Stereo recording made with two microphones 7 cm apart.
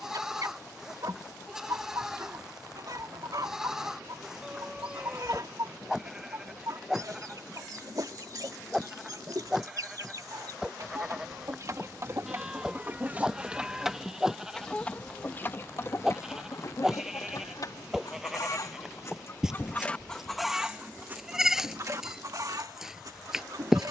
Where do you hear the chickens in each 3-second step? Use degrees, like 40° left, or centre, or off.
60° right, 60° right, 60° right, 50° right, 20° right, 40° left, 30° left, 50° right.